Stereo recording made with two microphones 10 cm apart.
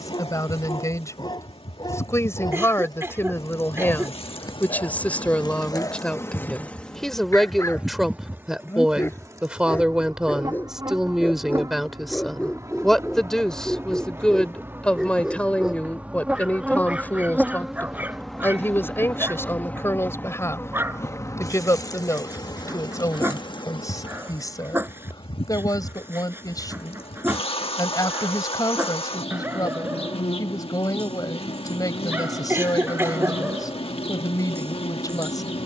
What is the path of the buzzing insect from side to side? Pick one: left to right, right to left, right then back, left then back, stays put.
right then back.